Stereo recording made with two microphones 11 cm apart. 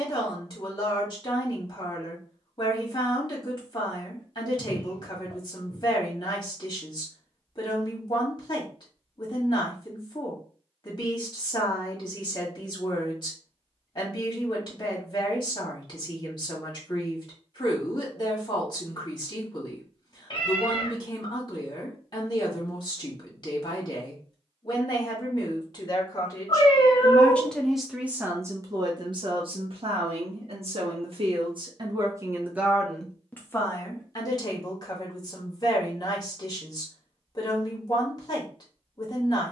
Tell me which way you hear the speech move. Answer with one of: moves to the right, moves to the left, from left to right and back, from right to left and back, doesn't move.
from left to right and back.